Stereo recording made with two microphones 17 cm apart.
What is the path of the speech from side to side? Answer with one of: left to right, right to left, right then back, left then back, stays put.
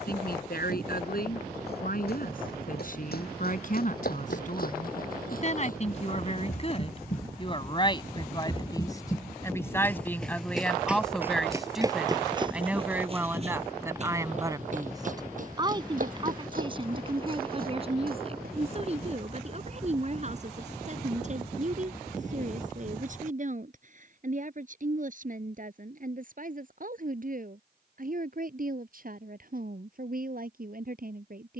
left to right.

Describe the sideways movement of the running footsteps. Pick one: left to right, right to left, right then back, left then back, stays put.
left to right.